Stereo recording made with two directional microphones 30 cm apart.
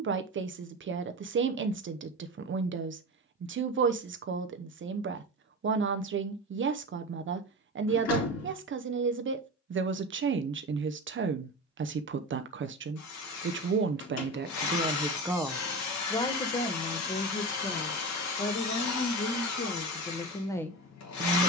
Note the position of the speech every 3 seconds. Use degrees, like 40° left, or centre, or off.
40° right, 40° right, 40° right, 40° right, 40° right, 20° left, 30° left.